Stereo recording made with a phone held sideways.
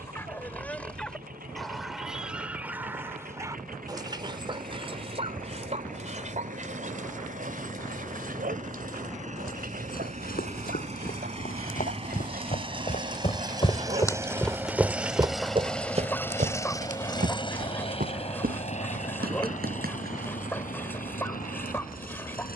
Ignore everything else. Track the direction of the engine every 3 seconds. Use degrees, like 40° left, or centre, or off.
70° right, 60° right, 60° right, 50° right, 30° right, 20° left, 50° left, 70° left.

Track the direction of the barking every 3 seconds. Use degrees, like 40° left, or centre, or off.
centre, 30° right, 60° right, 80° right, 60° right, 10° left, 10° left, 10° left.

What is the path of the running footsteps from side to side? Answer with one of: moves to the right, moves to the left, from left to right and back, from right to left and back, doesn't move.
moves to the right.